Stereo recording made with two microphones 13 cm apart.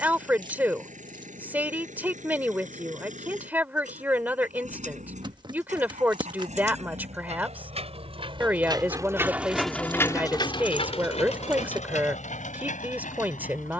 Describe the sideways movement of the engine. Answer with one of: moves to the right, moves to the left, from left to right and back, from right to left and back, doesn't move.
moves to the left.